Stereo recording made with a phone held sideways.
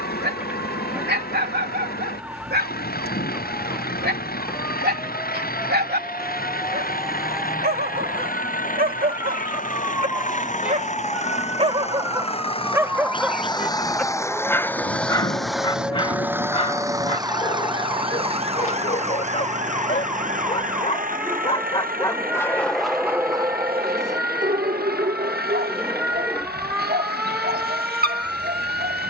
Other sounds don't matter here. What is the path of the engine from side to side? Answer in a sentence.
In this clip you hear the engine move from left to right.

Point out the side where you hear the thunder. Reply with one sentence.
You can hear the thunder on the left.